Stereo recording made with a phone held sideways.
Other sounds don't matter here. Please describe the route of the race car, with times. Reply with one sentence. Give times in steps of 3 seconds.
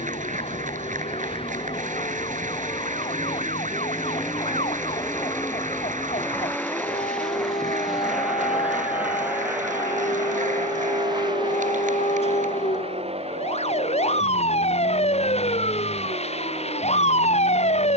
In this clip you hear the race car on the left from 0 s, in the centre from 6 s and on the right from 9 s.